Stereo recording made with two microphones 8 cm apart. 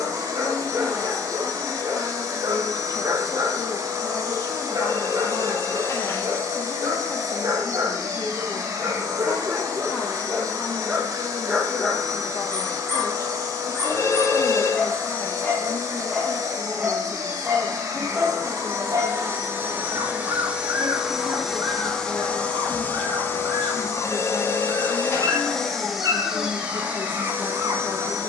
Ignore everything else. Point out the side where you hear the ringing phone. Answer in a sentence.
In this clip you hear the ringing phone on the left.